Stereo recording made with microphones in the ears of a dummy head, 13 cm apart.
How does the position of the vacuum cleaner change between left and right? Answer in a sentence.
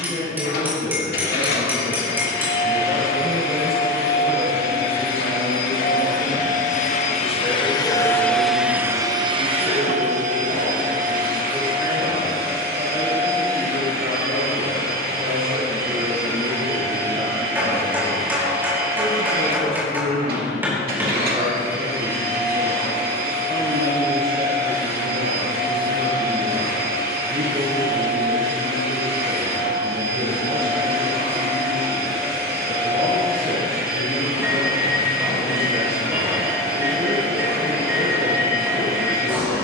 In this clip you hear the vacuum cleaner move from left to right.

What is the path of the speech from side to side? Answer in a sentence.
In this clip you hear the speech move to the right.